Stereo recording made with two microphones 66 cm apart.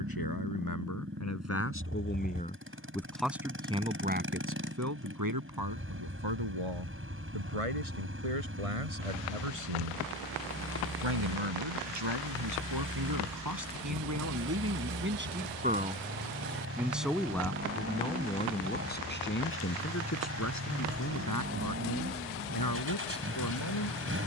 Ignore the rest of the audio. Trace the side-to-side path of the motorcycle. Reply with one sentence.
In this clip you hear the motorcycle stay put.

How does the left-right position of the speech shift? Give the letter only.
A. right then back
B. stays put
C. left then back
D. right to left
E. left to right
A.